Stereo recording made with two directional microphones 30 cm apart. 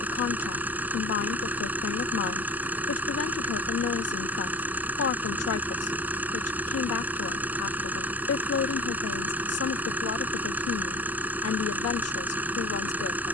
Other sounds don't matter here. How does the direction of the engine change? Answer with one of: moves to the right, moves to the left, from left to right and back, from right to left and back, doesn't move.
doesn't move.